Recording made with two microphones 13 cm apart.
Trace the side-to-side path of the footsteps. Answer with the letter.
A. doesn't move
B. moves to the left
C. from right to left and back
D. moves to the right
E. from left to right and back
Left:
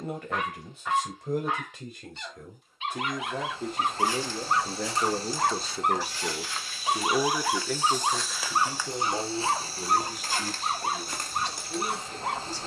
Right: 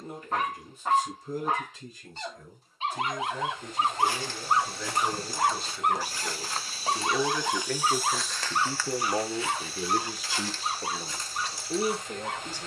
B.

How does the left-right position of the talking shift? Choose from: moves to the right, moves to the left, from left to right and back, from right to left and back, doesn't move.
moves to the right.